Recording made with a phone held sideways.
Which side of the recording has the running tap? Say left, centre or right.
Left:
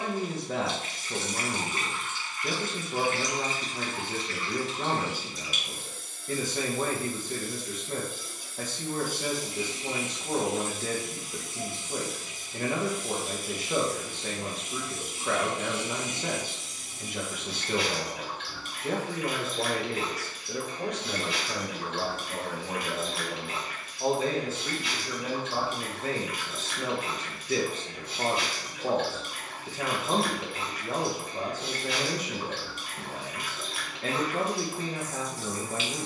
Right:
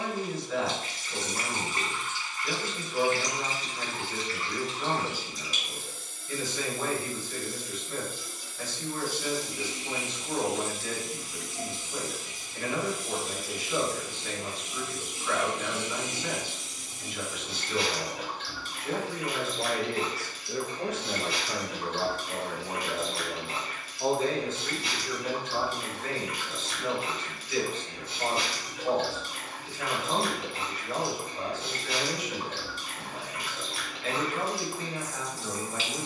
right.